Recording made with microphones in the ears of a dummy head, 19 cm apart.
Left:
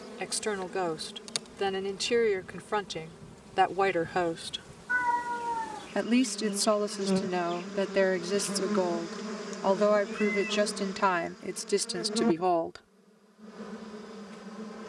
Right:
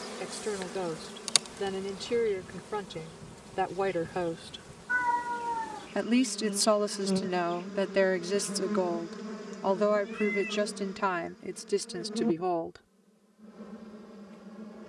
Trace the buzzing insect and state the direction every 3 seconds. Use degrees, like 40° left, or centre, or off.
40° right, 10° right, 20° left, 40° left, 50° left.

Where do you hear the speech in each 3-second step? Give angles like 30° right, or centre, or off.
50° left, 40° left, centre, 20° left, 30° left.